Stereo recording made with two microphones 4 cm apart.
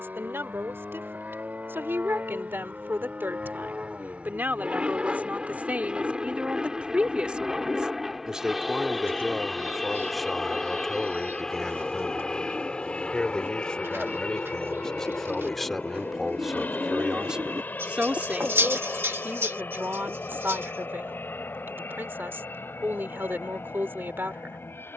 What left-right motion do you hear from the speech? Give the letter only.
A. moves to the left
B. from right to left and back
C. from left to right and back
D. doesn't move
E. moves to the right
B.